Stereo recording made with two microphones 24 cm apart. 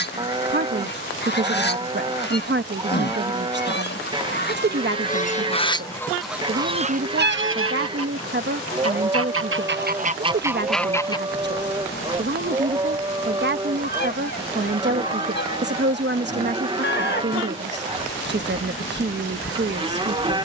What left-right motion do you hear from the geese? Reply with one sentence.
In this clip you hear the geese go right and come back.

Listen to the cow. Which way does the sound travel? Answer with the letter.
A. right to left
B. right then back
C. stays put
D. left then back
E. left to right
C.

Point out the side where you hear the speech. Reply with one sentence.
In this clip you hear the speech on the right.